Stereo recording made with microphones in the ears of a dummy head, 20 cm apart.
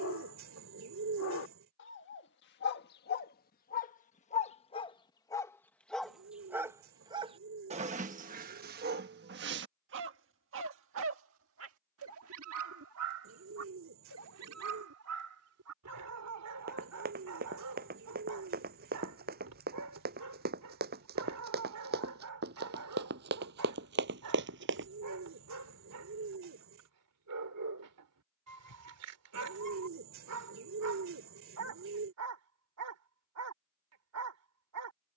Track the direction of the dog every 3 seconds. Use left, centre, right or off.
left, left, right, right, right, right, right, right, right, right, right, right.